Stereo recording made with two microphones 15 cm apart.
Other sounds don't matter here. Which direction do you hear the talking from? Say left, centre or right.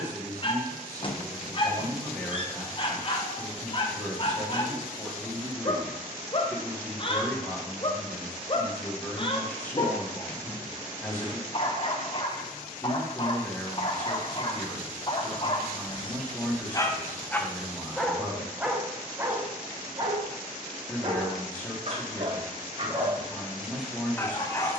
centre.